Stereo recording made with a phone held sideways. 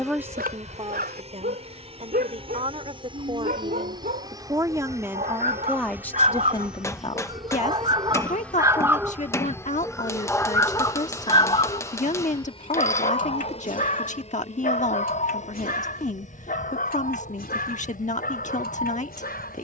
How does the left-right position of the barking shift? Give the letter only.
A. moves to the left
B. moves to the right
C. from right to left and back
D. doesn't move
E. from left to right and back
A.